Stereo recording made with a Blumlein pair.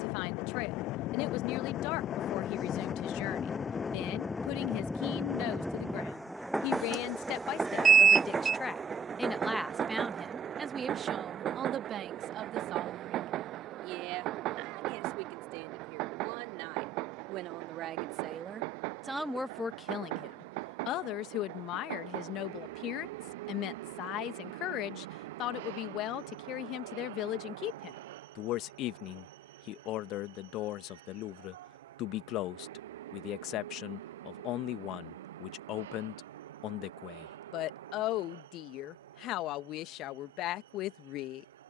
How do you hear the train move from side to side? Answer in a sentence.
In this clip you hear the train go from the left side to the right.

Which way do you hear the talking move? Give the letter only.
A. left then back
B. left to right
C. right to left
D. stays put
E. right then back
E.